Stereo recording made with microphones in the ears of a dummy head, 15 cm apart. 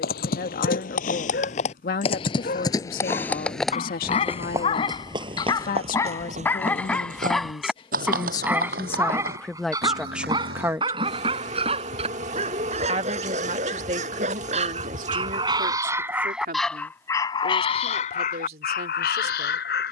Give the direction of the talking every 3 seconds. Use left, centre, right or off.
left, left, left, centre, right, right, right.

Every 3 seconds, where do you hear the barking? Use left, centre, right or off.
left, left, centre, right, right, centre, left.